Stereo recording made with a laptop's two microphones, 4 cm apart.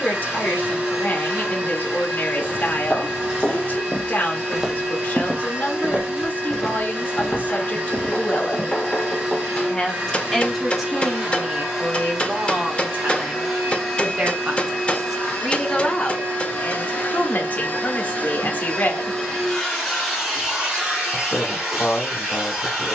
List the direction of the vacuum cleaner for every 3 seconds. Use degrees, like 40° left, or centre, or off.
20° right, 20° right, 20° right, 10° right, 10° left, 30° left, 10° left, 10° right.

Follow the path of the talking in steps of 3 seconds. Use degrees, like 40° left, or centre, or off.
50° left, 50° left, 50° left, centre, 40° right, 40° left, 50° left, 50° left.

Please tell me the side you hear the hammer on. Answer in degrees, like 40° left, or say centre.
30° left.